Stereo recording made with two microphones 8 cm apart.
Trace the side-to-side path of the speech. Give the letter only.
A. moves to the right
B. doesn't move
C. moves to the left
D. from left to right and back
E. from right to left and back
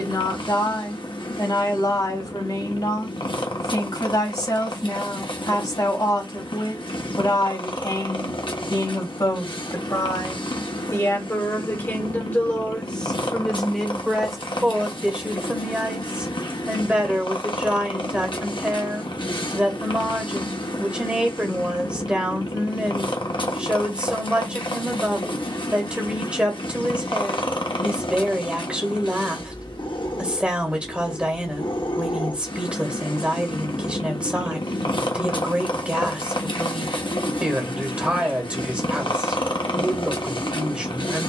A.